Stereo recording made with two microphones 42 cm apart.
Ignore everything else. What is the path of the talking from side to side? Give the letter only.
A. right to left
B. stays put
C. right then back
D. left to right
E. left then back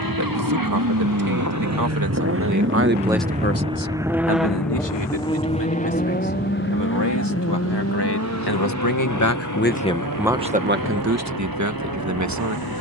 E.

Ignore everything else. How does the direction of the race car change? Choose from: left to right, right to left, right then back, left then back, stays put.
right to left.